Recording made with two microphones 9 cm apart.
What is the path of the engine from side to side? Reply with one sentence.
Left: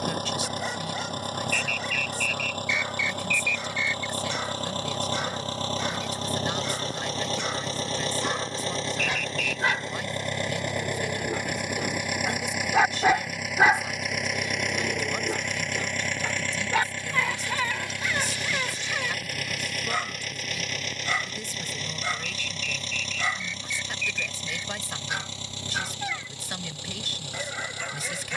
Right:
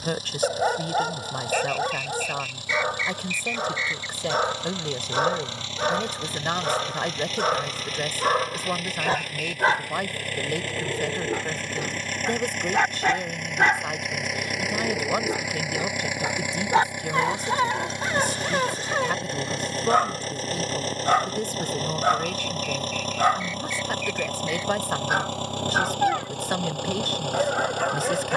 You can hear the engine travel towards the right.